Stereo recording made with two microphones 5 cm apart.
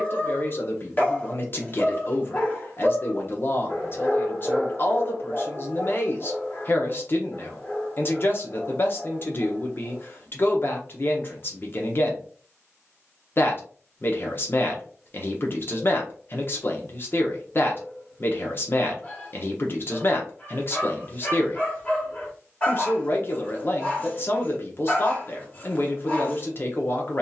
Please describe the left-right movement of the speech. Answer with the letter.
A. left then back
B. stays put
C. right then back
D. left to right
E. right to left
B.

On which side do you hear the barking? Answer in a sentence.
You can hear the barking on the left.